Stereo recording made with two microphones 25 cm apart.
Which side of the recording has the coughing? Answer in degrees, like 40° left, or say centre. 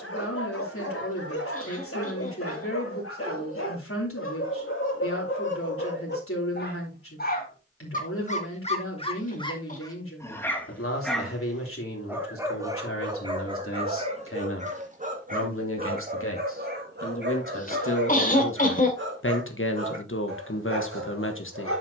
30° left.